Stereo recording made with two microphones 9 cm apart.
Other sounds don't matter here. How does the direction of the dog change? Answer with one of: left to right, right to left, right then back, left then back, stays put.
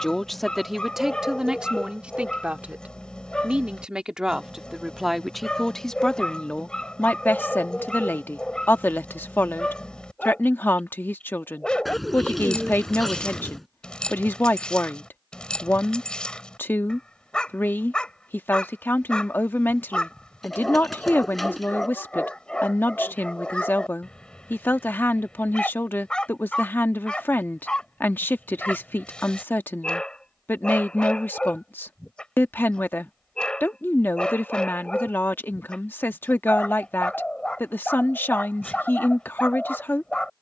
stays put.